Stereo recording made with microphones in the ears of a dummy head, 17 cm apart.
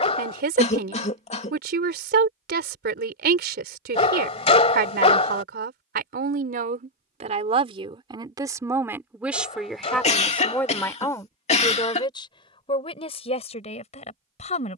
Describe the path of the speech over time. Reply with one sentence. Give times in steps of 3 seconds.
You can hear the speech on the right from 0 s, in the centre from 9 s and on the left from 12 s.